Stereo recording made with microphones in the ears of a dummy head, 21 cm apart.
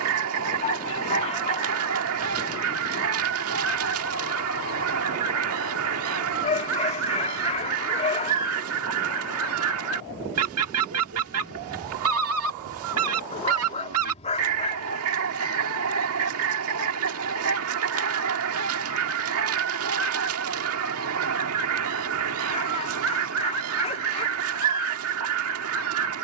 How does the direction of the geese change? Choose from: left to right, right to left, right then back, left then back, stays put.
stays put.